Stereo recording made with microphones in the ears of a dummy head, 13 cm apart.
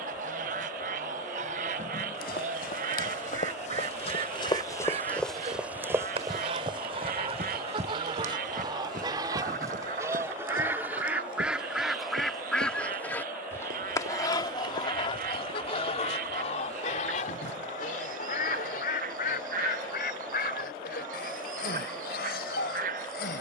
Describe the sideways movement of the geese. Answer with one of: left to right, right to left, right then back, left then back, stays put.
right to left.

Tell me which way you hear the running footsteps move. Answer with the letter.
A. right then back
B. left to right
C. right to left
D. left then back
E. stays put
B.